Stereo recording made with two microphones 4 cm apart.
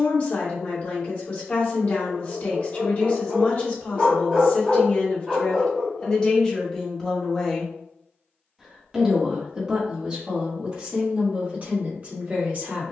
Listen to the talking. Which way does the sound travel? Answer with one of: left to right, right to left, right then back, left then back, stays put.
left to right.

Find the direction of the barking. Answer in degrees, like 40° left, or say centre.
10° right.